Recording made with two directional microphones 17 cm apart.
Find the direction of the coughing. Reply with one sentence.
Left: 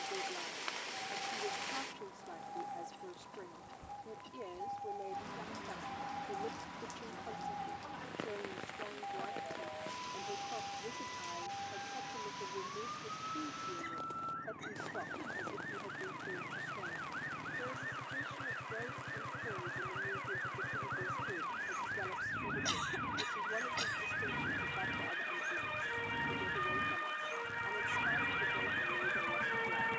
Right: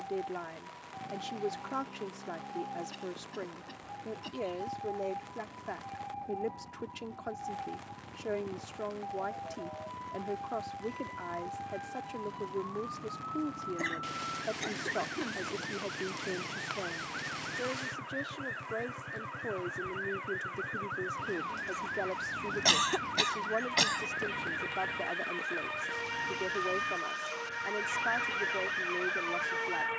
In this clip you hear the coughing on the right.